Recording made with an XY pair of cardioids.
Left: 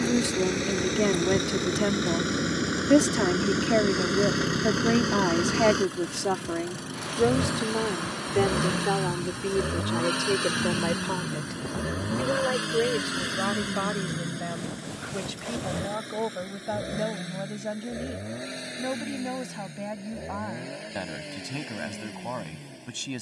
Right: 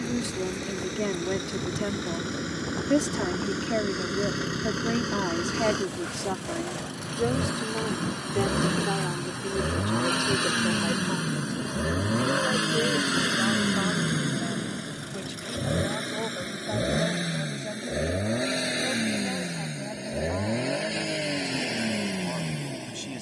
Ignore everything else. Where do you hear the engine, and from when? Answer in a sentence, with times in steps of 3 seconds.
You can hear the engine on the left from 0 s, in the centre from 6 s and on the right from 12 s.